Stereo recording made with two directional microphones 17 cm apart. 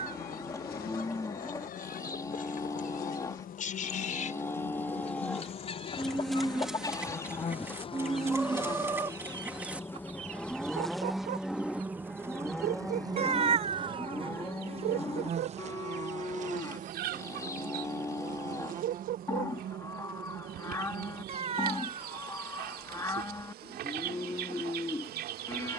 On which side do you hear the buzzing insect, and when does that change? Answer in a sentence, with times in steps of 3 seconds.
In this clip you hear the buzzing insect on the left from 0 s, in the centre from 9 s and on the right from 12 s.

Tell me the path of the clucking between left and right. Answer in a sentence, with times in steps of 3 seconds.
You can hear the clucking on the left from 0 s, in the centre from 6 s and on the right from 9 s.